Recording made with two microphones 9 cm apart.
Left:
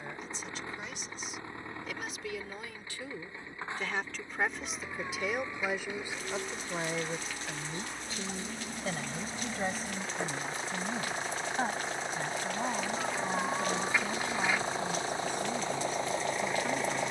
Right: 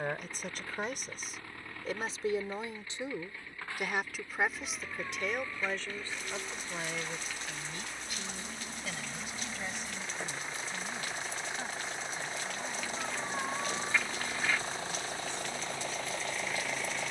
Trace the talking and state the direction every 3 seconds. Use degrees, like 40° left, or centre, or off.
40° right, centre, 30° left, 40° left, 50° left, 60° left.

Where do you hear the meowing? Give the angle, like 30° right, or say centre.
10° left.